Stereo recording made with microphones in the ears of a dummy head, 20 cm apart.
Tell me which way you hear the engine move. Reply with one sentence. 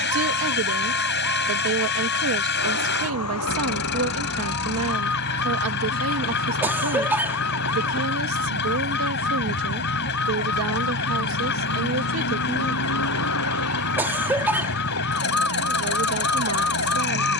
You can hear the engine stay put.